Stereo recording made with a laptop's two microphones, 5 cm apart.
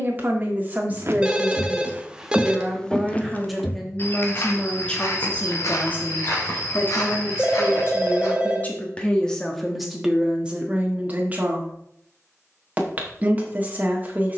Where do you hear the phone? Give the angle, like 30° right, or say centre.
20° right.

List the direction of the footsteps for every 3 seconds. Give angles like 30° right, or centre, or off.
30° right, 50° left, 60° left, off, off.